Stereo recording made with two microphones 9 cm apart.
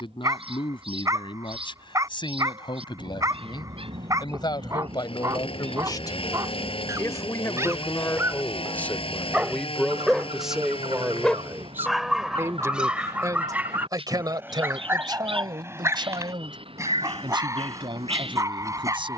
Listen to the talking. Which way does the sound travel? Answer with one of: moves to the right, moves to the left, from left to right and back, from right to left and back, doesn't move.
moves to the right.